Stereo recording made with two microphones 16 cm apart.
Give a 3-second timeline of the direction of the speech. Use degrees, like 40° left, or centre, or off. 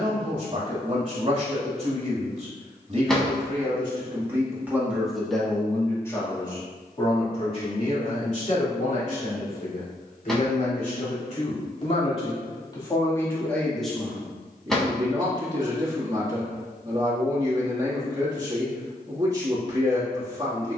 40° right, 10° right, 40° left, 50° left, 10° left, 20° right, 20° right.